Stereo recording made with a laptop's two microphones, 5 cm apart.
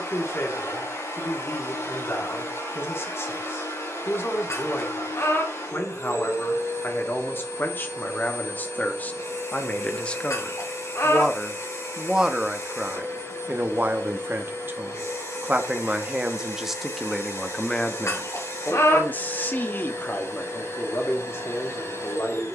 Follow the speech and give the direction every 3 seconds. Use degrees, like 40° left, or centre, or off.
50° left, 50° left, 40° left, 20° left, 30° right, 10° right, 40° left, 50° left.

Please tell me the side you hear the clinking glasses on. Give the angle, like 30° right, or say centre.
70° left.